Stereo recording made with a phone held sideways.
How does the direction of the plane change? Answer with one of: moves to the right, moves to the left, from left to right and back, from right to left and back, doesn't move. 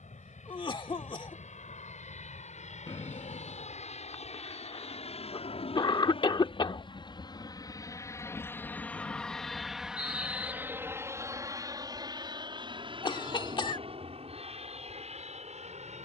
moves to the right.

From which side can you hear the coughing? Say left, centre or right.
left.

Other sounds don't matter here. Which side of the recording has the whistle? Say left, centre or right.
left.